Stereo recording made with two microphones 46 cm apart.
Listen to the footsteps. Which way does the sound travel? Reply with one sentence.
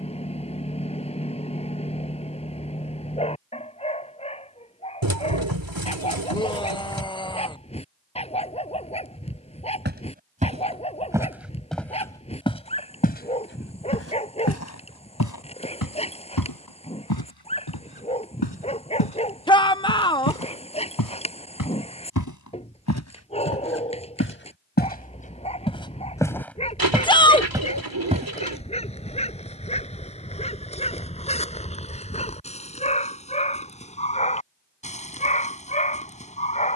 In this clip you hear the footsteps move from right to left and back again.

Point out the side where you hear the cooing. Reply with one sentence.
In this clip you hear the cooing on the right.